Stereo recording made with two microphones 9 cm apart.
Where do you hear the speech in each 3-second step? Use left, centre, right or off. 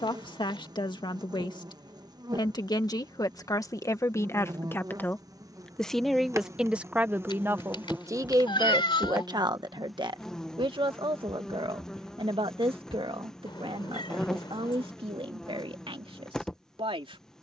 left, left, right, right, right, right.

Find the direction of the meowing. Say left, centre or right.
left.